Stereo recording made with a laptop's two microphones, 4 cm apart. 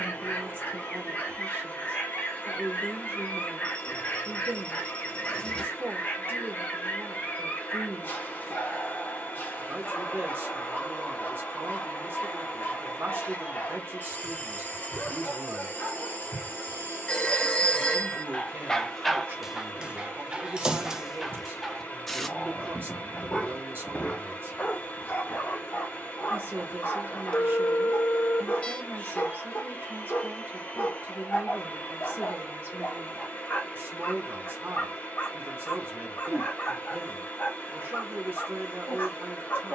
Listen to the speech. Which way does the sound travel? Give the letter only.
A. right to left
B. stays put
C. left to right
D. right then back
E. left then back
B.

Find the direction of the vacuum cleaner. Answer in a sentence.
You can hear the vacuum cleaner on the left.